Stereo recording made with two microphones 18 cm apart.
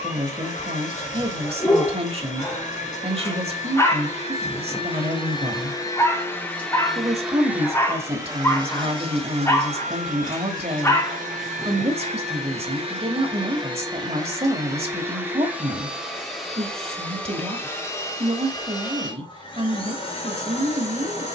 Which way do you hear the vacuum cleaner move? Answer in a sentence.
You can hear the vacuum cleaner move from left to right and back again.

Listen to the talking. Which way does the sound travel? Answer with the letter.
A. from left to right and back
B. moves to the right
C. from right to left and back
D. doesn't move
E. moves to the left
D.